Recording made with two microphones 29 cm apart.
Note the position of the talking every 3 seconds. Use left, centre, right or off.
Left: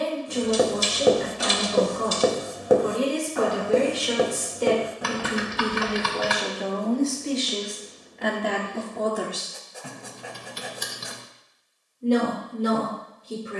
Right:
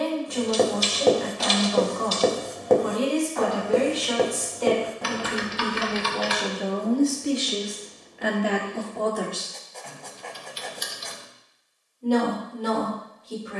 left, left, centre, centre, left.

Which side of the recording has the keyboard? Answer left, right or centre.
left.